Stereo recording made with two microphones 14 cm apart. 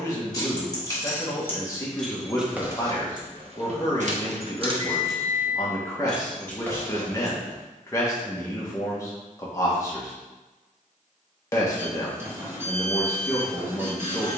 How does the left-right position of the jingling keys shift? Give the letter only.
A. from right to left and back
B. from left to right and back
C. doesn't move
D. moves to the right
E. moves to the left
B.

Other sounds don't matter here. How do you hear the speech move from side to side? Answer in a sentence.
You can hear the speech stay put.